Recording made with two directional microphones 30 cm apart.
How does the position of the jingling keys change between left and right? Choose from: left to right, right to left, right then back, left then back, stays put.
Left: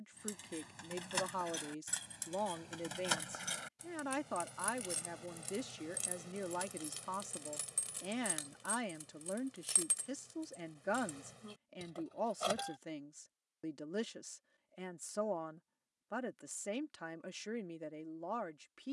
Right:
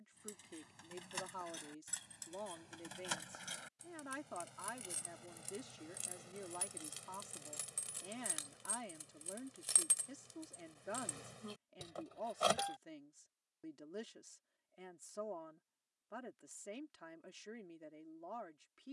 left to right.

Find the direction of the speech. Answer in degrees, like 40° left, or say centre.
60° left.